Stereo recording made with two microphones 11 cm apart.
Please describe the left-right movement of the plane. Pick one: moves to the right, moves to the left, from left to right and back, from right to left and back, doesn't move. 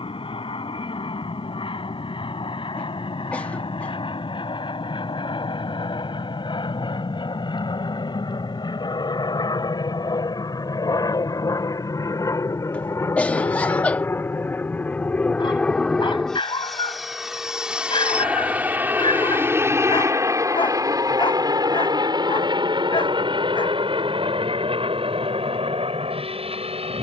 moves to the right.